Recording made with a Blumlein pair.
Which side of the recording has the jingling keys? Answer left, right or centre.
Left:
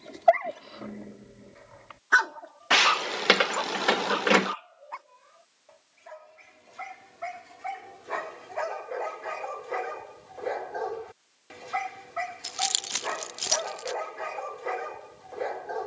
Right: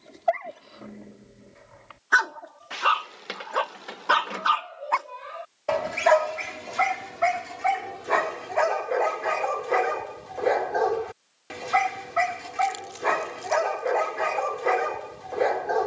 left.